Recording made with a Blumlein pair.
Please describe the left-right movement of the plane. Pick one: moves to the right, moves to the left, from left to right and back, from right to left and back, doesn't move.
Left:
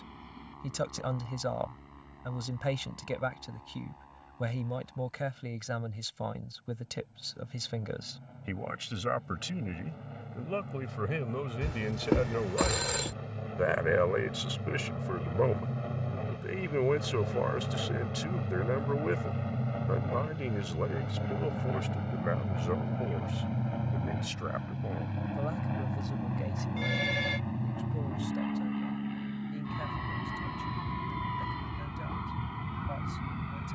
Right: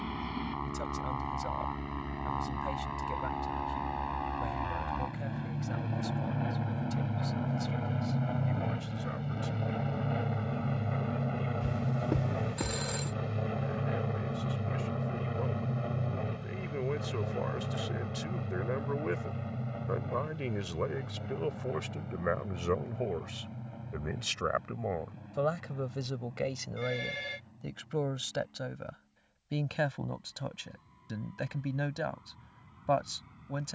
moves to the left.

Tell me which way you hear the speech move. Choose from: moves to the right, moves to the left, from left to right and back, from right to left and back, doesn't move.
moves to the right.